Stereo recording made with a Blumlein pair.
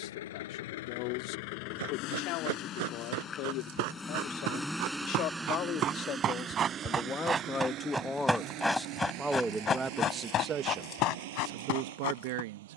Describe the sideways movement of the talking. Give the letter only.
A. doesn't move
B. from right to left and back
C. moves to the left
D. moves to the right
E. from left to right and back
D.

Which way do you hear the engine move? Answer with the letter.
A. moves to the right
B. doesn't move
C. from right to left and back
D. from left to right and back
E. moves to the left
A.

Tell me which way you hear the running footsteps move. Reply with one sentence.
In this clip you hear the running footsteps move from right to left.